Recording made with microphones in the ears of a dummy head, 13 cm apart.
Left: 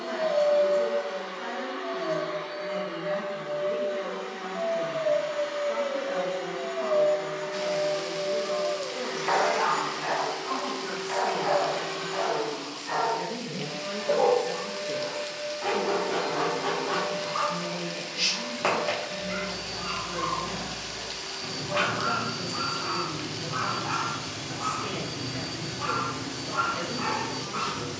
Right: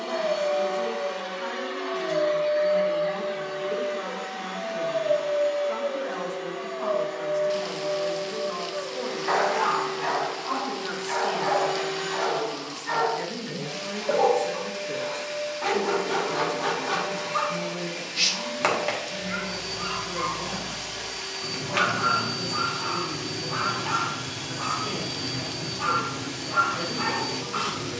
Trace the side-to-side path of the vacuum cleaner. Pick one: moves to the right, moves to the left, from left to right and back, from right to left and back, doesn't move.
from right to left and back.